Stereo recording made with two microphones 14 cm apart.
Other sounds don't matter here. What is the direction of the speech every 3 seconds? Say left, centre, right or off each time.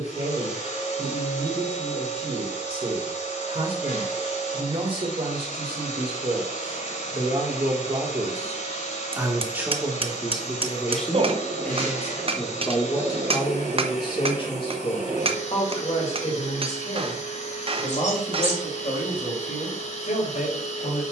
right, right, right, centre, left, left, left.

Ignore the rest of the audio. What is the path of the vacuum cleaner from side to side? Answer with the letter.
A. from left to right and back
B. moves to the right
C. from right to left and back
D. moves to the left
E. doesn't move
E.